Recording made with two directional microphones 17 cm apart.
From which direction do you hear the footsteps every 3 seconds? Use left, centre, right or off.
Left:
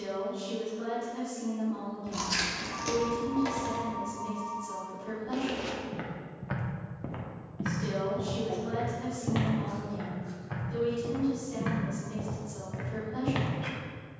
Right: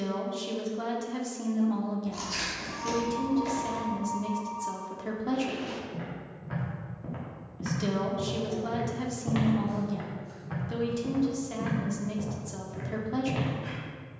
off, left, left, centre, left.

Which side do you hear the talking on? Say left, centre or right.
right.